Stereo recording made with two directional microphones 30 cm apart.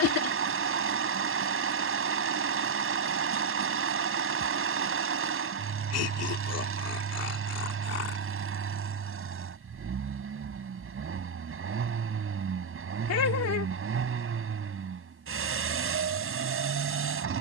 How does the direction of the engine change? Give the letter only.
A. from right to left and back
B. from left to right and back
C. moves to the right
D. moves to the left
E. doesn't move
E.